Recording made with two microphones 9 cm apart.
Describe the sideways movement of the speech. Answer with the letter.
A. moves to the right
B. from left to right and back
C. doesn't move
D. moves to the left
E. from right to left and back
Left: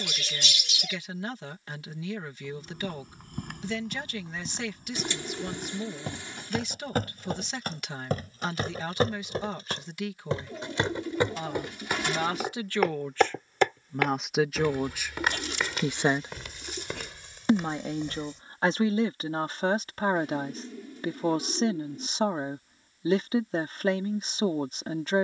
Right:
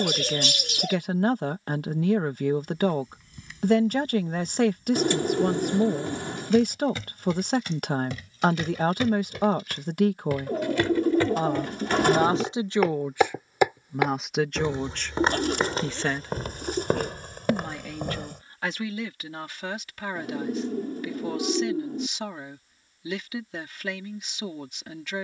D.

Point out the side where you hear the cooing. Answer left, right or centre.
right.